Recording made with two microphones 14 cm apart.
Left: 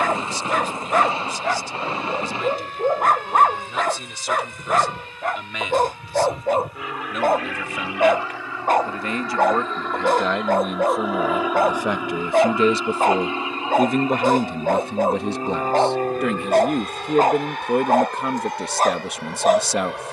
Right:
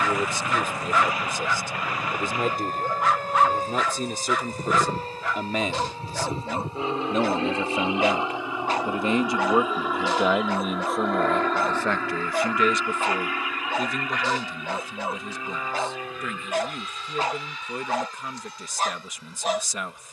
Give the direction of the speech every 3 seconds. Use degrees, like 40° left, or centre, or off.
50° right, 40° right, 30° right, centre, 40° left, 60° left, 60° left.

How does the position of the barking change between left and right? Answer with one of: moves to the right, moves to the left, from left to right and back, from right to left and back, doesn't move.
doesn't move.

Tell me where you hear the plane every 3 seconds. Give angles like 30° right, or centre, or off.
50° right, 40° right, 20° right, centre, 20° left, 40° left, 60° left.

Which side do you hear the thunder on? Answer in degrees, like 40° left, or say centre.
30° left.